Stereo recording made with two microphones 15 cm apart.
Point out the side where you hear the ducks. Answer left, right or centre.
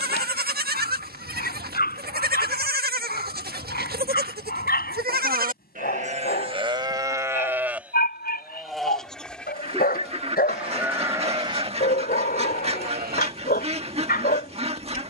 right.